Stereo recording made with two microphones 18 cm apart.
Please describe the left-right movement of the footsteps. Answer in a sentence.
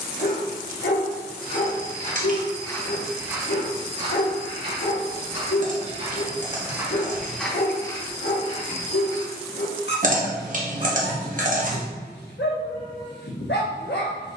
In this clip you hear the footsteps move from left to right and back again.